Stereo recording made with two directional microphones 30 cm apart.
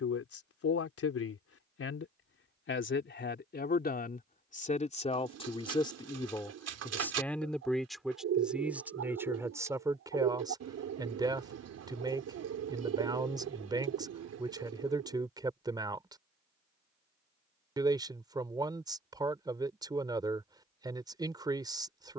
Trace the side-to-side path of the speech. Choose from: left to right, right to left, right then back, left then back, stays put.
left to right.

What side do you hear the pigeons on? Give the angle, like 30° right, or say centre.
60° right.